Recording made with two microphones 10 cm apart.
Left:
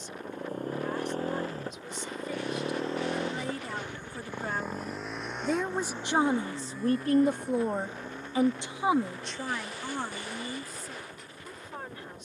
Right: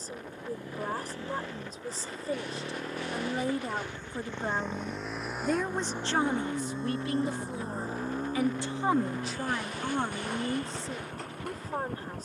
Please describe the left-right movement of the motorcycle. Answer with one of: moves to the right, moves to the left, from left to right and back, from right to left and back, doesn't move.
moves to the right.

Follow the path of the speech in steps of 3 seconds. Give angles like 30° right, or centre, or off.
40° right, 10° right, 30° left, 20° right.